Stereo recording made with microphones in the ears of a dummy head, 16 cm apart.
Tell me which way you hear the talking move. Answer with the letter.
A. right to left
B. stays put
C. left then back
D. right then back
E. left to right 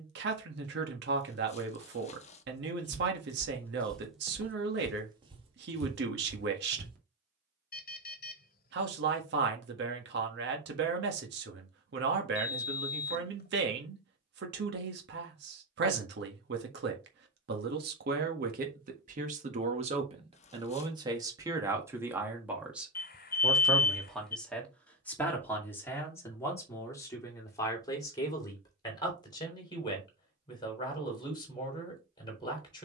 A.